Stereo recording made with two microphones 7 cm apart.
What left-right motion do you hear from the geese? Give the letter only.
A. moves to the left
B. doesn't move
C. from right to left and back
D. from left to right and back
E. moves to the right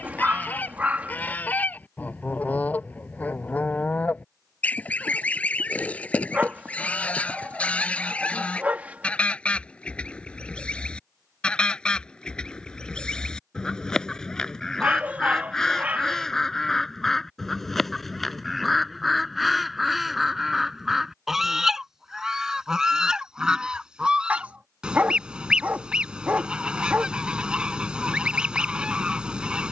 E.